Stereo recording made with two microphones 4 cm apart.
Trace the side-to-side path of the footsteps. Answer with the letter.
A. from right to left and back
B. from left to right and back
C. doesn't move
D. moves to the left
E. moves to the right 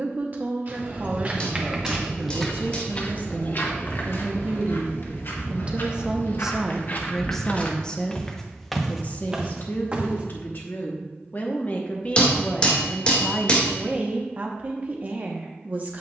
A.